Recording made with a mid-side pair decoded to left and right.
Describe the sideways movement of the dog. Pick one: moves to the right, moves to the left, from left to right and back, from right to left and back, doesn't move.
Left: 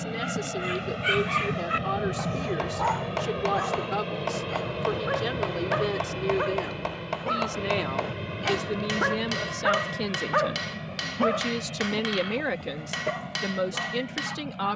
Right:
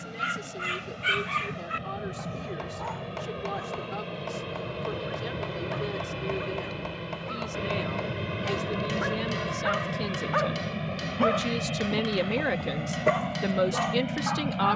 from right to left and back.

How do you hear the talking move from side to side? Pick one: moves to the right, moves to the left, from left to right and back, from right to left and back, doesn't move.
moves to the right.